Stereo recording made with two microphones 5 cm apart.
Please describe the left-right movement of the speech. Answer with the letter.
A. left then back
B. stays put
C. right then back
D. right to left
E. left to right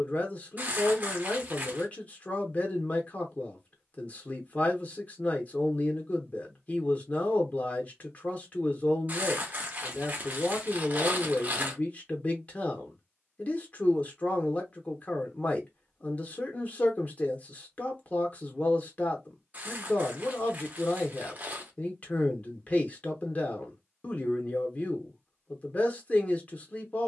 B.